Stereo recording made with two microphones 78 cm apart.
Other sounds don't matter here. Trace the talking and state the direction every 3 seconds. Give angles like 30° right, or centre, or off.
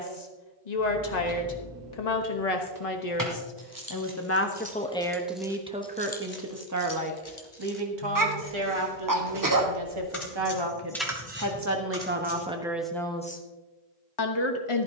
60° left, 10° left, 30° right, 30° right, 10° left.